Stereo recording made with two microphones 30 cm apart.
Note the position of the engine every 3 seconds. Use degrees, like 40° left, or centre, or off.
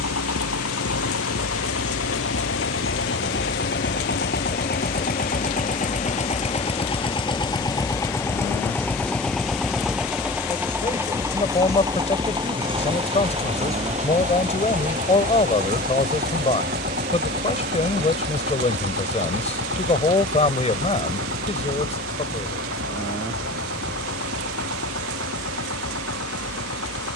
50° left, 30° left, 10° left, 10° right, 20° right, 30° right, 40° right, 50° right, 50° right.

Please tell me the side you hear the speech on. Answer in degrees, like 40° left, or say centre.
20° left.